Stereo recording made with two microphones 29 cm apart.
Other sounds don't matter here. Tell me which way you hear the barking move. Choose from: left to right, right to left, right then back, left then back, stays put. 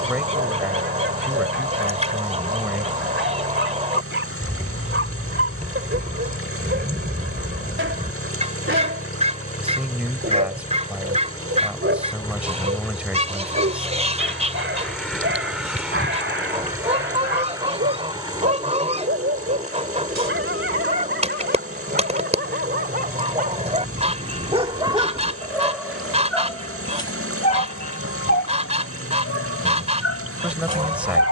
right to left.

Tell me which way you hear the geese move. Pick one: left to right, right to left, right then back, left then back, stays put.
stays put.